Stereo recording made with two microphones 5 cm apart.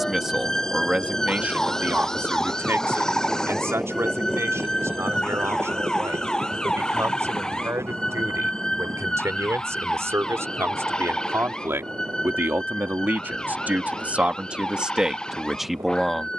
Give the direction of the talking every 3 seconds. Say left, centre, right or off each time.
right, right, right, right, right, centre.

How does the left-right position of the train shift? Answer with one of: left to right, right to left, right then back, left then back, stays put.
left to right.